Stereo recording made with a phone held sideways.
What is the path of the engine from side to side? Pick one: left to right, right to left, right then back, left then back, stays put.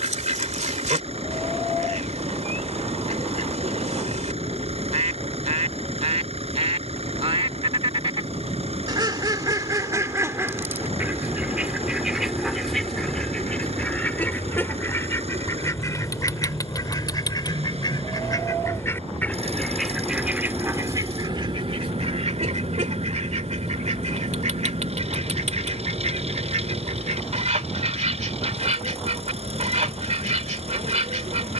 stays put.